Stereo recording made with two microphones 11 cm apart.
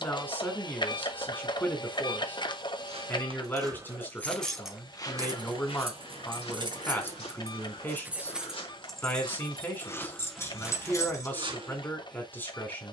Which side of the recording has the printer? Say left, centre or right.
left.